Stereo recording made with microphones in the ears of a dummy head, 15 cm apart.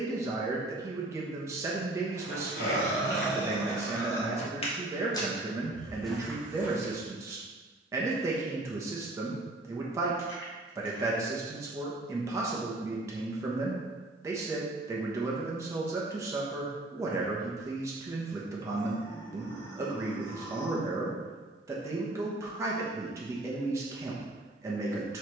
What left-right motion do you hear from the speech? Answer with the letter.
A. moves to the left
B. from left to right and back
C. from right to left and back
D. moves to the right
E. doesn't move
E.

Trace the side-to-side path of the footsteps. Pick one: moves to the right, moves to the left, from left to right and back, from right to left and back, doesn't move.
moves to the right.